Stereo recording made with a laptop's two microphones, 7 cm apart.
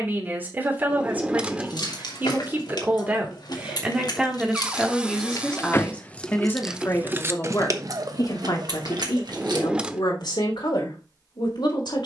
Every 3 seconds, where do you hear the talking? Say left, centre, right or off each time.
right, centre, left, left.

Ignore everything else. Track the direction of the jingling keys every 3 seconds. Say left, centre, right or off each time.
left, left, right, right.